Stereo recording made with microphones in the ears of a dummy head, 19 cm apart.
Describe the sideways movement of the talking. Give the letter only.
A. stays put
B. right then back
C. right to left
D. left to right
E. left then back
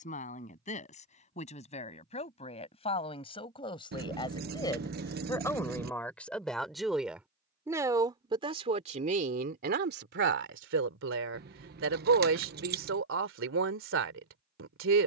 D.